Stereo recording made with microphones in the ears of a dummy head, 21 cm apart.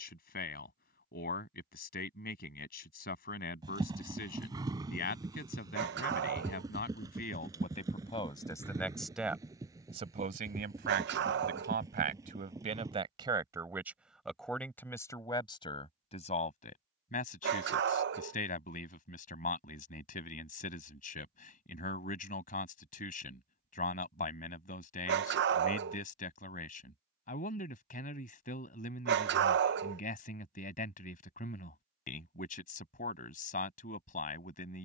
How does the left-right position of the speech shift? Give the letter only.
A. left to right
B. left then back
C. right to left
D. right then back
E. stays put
D.